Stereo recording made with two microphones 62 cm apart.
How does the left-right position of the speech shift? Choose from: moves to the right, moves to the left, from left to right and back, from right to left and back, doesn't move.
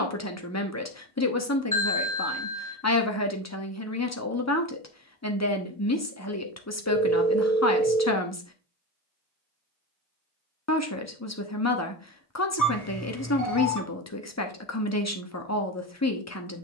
doesn't move.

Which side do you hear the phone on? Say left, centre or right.
left.